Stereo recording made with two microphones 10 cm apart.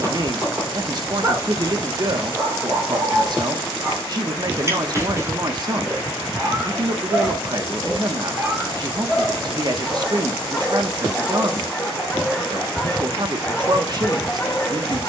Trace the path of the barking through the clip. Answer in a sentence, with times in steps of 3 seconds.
You can hear the barking on the right from 0 s and in the centre from 9 s.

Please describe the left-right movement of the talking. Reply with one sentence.
In this clip you hear the talking stay put.